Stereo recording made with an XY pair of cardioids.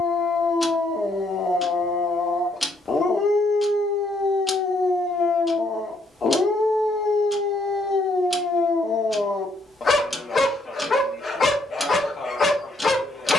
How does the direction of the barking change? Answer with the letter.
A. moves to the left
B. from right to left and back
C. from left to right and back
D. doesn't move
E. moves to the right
D.